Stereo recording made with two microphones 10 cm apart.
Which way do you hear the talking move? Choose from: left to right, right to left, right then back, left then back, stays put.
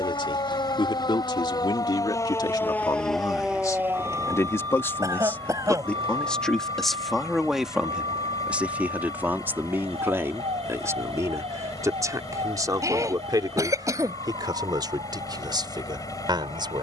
left to right.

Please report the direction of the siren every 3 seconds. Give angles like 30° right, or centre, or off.
40° left, 30° right, 70° right, 80° right, 80° right, 80° right.